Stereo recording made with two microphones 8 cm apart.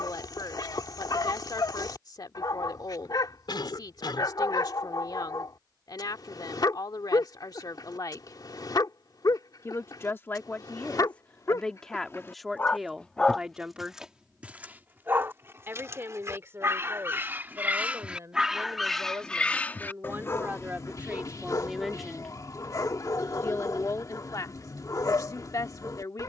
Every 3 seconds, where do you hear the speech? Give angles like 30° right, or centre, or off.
60° left, 60° left, 60° left, 20° left, 10° right, 30° right, 30° right, 10° left, 50° left.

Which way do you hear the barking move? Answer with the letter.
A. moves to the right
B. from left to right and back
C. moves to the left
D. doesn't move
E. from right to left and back
B.